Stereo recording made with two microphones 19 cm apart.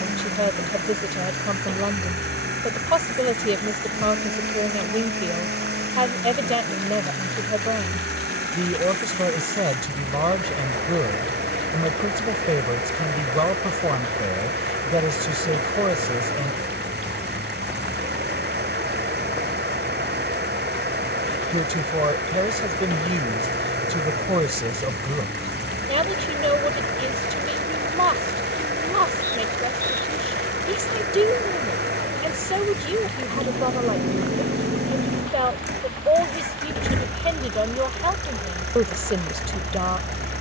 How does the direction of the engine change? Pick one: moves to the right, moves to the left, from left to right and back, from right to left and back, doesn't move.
doesn't move.